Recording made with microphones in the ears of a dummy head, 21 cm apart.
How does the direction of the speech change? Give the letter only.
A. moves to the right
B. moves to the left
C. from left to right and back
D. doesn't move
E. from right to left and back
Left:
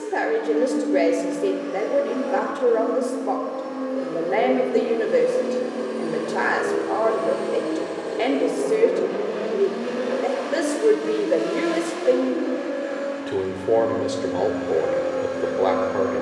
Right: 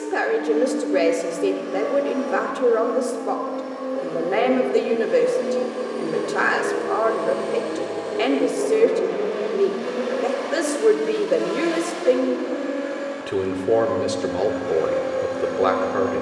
D.